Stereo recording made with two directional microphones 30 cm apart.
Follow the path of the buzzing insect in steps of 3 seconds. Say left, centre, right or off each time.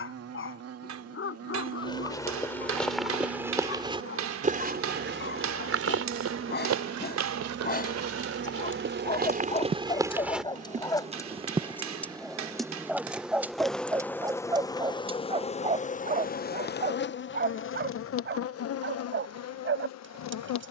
right, right, right, right, centre, left, left.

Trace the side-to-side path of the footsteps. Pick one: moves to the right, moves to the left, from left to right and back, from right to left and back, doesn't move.
from left to right and back.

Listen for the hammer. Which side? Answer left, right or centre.
right.